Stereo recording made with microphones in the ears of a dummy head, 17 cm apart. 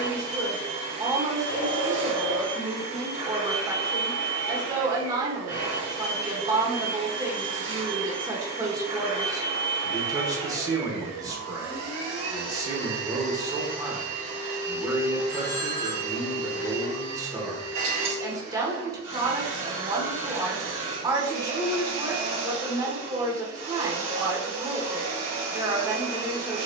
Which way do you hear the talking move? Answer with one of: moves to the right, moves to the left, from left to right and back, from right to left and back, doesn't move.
doesn't move.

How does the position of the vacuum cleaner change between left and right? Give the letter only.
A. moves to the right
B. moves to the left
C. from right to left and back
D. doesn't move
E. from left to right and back
D.